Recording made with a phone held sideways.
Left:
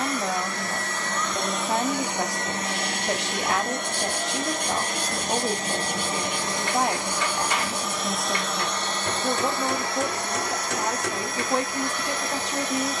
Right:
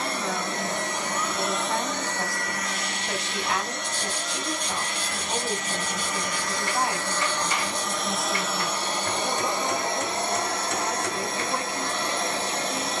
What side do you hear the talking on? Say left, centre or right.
left.